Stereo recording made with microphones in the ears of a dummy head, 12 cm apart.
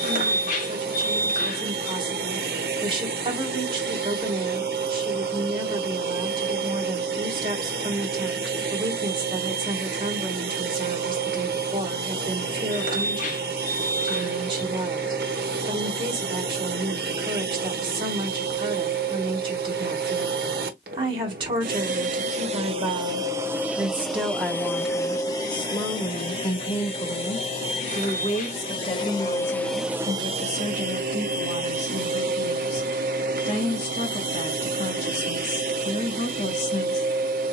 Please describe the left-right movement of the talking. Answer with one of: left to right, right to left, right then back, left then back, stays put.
right to left.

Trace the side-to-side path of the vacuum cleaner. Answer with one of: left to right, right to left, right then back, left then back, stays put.
left then back.